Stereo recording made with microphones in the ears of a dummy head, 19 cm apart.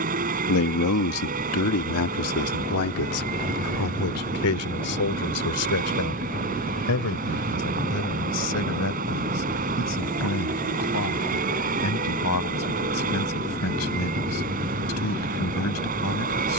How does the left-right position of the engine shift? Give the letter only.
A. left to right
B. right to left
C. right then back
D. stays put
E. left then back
D.